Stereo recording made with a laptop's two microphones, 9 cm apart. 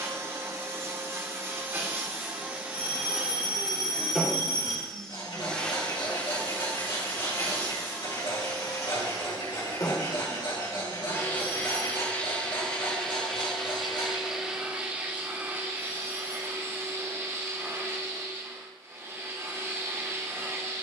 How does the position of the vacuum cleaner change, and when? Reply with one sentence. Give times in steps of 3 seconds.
In this clip you hear the vacuum cleaner on the right from 0 s, in the centre from 3 s, on the left from 6 s, in the centre from 12 s and on the right from 15 s.